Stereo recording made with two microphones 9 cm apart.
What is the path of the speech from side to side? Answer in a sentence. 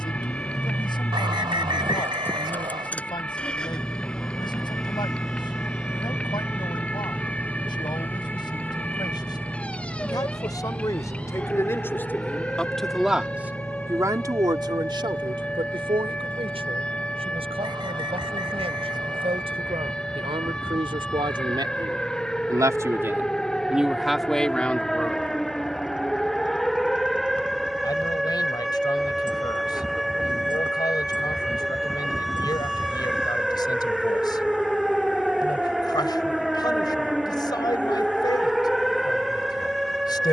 In this clip you hear the speech move from left to right and back again.